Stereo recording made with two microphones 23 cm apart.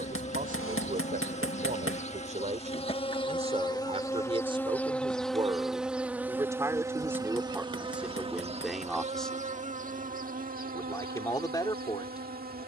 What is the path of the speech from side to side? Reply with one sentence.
In this clip you hear the speech travel towards the left.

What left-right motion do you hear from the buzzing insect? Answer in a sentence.
You can hear the buzzing insect move from left to right.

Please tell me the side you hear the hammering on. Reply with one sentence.
In this clip you hear the hammering on the left.